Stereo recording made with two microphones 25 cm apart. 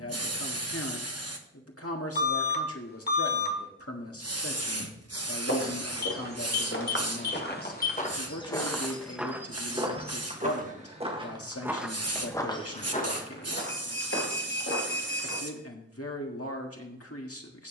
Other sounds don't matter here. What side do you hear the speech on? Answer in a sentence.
In this clip you hear the speech on the left.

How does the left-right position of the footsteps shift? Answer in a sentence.
You can hear the footsteps move from left to right and back again.